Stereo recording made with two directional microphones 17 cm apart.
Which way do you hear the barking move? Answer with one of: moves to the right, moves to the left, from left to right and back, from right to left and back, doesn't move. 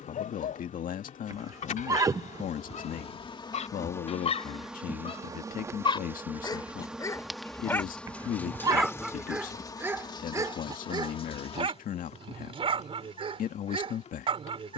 moves to the right.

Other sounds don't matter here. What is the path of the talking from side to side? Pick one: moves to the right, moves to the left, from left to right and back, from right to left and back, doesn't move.
doesn't move.